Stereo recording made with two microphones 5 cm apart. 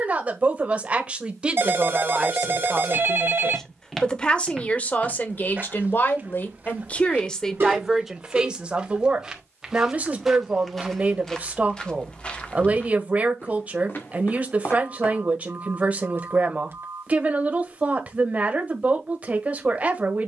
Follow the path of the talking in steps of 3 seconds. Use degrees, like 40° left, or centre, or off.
20° right, 30° left, 10° left, 30° right, 30° right, 30° right, 30° right.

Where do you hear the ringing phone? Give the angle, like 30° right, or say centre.
50° right.